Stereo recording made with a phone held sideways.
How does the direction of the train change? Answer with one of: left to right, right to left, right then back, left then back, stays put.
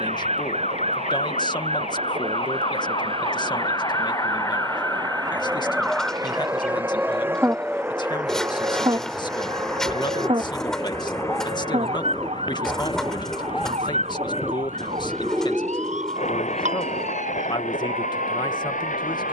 right to left.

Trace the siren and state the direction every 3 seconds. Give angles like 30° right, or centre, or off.
50° left, 20° left, 20° right, 40° right, 50° right, 60° right, 60° right.